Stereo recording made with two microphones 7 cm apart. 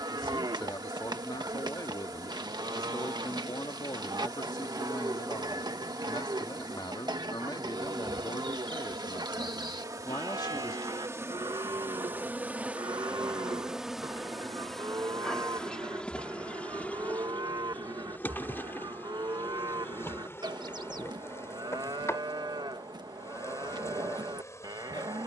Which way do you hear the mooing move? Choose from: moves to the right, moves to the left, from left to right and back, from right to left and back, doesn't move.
doesn't move.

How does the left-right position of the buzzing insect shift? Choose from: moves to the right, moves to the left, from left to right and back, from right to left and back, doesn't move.
moves to the left.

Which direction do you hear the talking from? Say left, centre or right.
left.